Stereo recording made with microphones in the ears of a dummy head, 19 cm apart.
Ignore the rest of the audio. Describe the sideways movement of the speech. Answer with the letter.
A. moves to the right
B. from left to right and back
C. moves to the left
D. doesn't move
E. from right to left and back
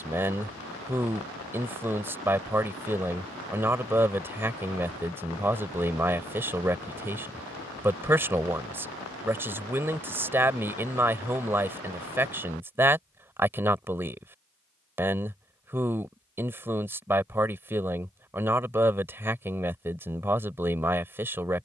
D.